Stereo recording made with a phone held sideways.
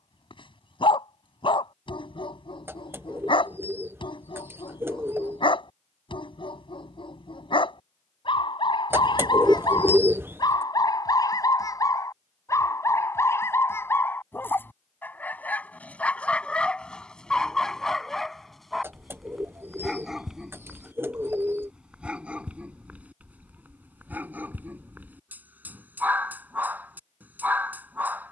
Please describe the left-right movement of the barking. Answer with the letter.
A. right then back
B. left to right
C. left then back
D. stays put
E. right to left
B.